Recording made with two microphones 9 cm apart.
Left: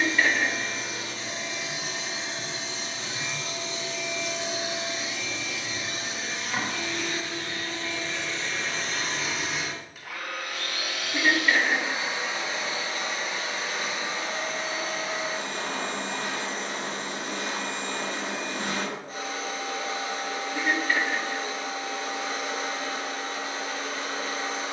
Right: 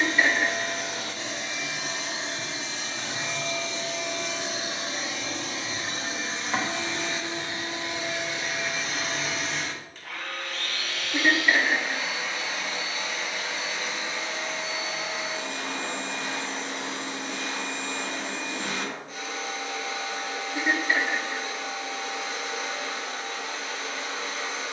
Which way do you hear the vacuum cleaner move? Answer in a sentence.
You can hear the vacuum cleaner travel towards the left.